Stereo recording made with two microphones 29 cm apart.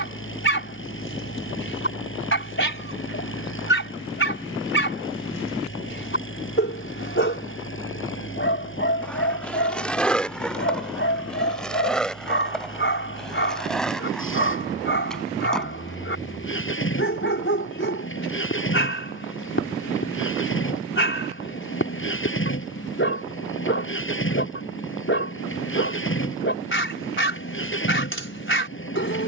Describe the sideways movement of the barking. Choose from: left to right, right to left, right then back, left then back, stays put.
stays put.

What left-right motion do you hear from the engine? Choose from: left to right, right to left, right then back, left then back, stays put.
stays put.